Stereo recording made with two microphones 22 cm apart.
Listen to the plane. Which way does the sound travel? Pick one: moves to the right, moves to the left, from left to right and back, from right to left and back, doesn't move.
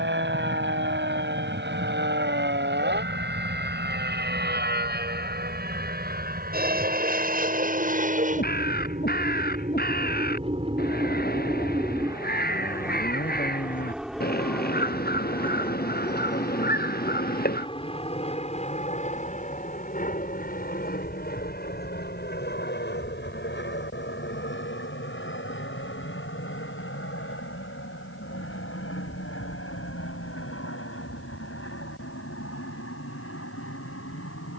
moves to the left.